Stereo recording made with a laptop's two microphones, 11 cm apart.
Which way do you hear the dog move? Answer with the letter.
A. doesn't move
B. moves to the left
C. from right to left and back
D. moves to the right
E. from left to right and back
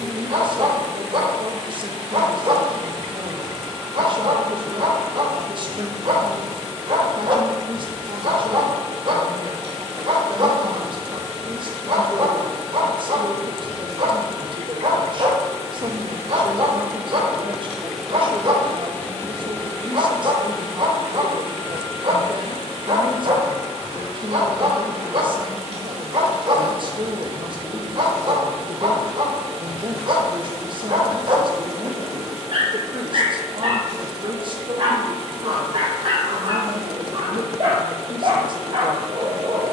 A.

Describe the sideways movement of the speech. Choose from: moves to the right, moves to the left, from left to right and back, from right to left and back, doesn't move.
doesn't move.